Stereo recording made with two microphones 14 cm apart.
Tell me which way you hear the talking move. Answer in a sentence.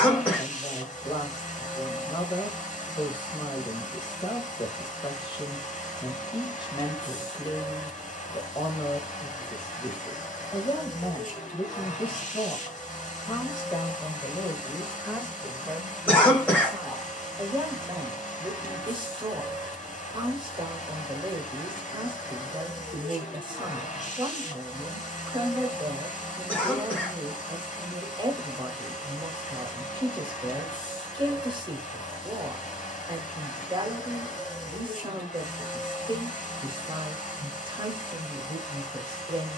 In this clip you hear the talking travel towards the right.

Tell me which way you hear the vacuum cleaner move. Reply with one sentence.
You can hear the vacuum cleaner stay put.